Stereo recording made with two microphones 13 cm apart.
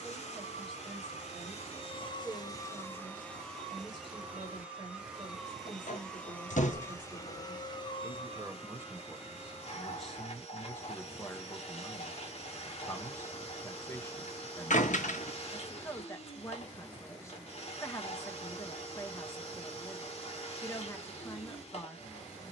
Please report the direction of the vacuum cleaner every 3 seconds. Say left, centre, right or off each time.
left, centre, left, left, left, left, left, left.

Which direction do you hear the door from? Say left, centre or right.
left.